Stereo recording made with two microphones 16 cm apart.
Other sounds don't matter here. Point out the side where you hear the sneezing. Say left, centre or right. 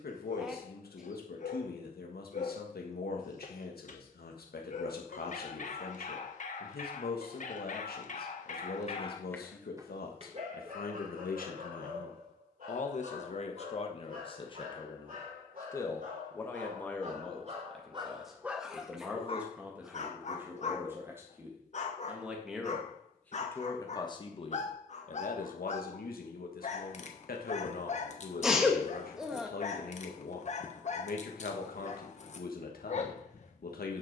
centre.